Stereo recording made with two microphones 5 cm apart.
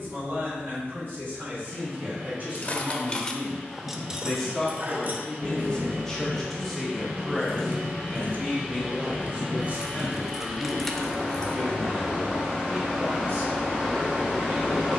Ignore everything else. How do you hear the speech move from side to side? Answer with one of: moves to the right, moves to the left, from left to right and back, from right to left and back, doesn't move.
from right to left and back.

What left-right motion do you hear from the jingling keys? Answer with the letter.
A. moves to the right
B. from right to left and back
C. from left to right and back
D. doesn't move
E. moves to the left
C.